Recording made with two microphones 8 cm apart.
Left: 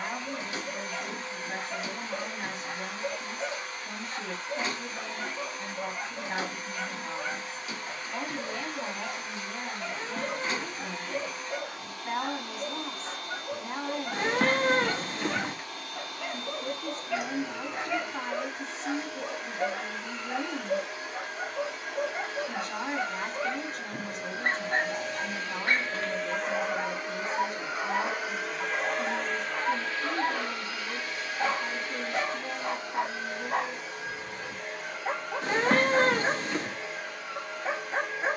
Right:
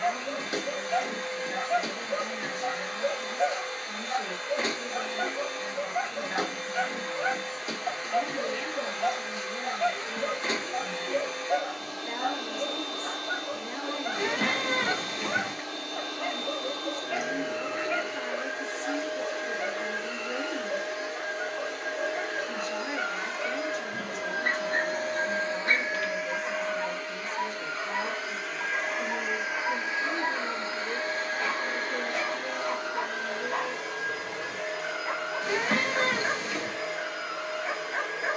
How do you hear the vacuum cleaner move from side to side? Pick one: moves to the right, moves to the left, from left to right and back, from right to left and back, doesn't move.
from right to left and back.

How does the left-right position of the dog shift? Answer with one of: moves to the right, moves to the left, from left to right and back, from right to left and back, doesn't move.
moves to the left.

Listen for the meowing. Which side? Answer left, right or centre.
left.